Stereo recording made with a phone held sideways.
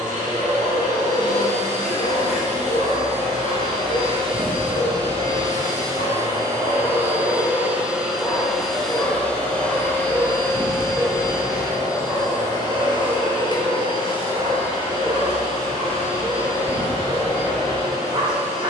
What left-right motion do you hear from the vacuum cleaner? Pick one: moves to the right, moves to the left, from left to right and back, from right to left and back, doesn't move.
moves to the left.